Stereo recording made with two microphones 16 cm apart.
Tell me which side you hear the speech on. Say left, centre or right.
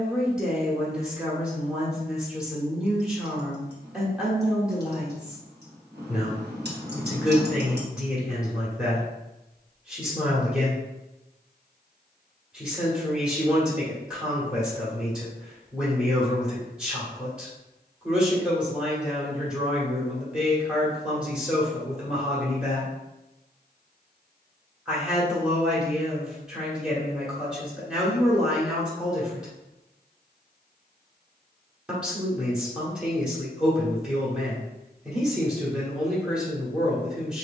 centre.